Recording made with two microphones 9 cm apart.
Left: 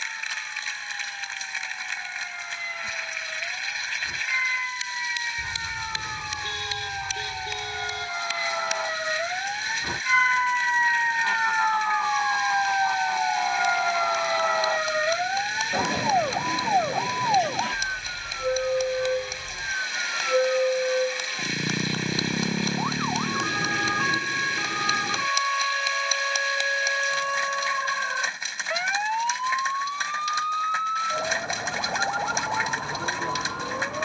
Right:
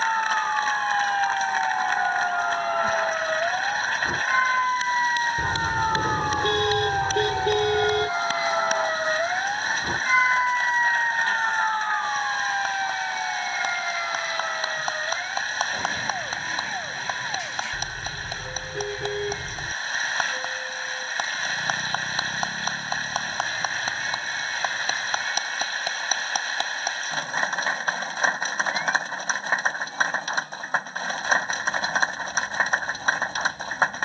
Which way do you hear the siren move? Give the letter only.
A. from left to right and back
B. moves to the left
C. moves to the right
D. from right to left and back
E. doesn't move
B.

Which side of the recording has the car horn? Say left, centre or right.
right.